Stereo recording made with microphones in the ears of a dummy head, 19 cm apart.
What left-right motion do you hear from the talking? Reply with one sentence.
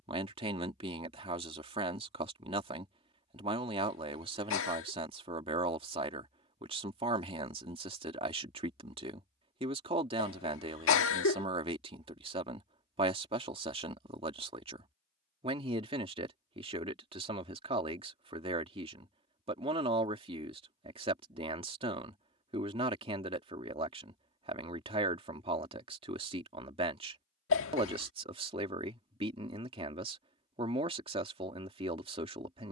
In this clip you hear the talking stay put.